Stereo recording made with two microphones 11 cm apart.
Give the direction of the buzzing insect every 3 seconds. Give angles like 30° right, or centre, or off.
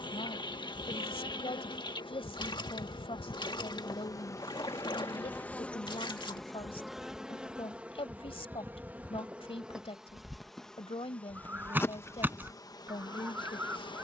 50° left, 30° left, 10° right, centre, 40° left.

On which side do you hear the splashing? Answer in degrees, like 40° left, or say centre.
50° left.